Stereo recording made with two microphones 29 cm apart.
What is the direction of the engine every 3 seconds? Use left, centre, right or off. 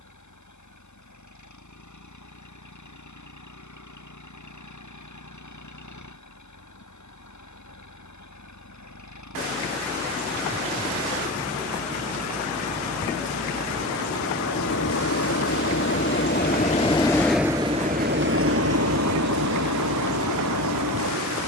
left, left, left, left, left, left, right.